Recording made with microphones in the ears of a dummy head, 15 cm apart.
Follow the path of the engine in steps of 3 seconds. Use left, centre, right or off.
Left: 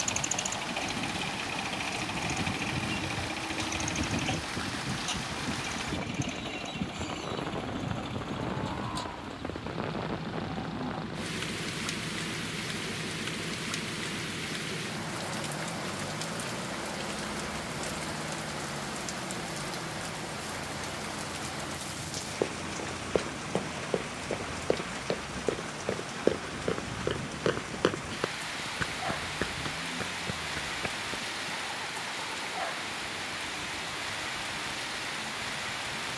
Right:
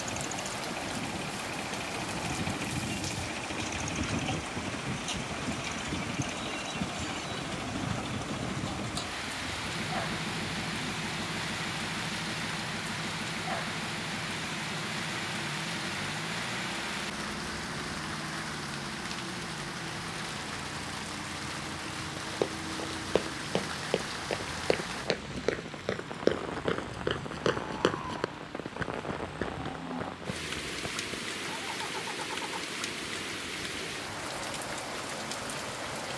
left, centre, centre, right, right, right, right, right, right, right, right, right.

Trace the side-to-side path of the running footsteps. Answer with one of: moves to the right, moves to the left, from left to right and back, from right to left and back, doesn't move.
moves to the left.